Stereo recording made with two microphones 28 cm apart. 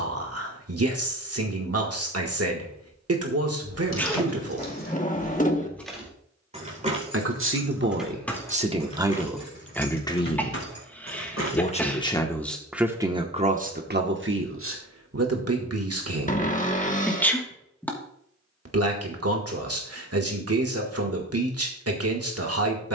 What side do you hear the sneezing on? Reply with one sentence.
In this clip you hear the sneezing in the centre.